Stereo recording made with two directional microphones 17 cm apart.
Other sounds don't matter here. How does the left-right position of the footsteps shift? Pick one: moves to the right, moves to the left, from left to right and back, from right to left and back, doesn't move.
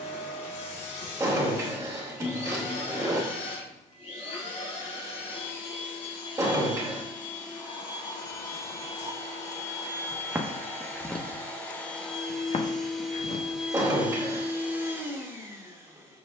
moves to the left.